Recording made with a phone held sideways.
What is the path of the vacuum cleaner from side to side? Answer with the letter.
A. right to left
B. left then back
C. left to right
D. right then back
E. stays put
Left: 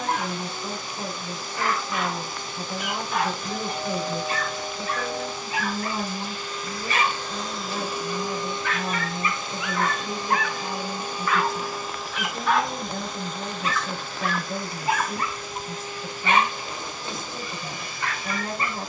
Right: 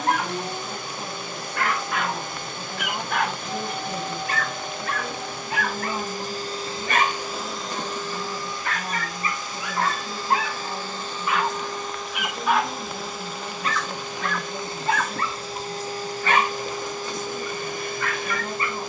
B.